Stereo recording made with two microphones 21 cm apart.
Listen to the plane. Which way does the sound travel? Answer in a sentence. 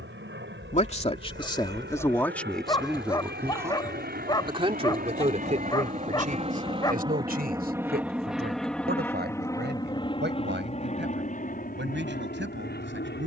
You can hear the plane move from right to left.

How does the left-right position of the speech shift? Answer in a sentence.
You can hear the speech go from the left side to the right.